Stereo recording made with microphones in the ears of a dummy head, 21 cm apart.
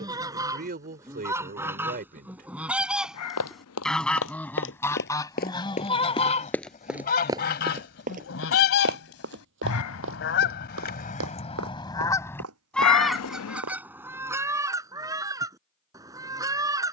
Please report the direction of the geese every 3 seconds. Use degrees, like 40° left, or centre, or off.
10° right, 10° left, 50° left, 50° left, centre, 20° right.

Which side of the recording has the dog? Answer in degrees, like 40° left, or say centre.
80° left.